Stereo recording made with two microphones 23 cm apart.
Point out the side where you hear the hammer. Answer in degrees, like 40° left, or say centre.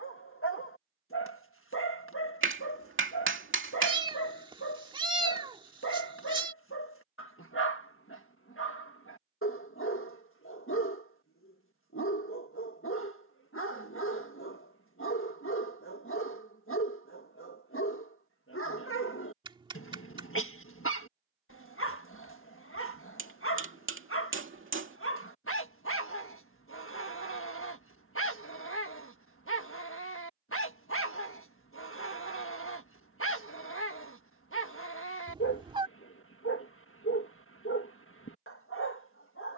60° right.